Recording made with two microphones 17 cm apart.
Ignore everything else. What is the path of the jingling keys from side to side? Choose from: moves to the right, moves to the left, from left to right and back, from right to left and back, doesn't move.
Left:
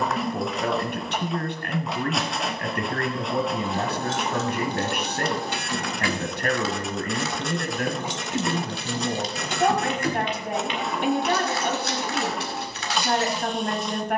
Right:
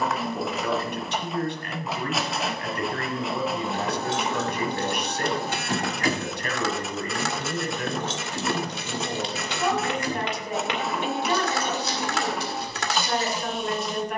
moves to the left.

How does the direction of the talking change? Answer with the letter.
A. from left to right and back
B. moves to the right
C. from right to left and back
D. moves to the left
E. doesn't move
E.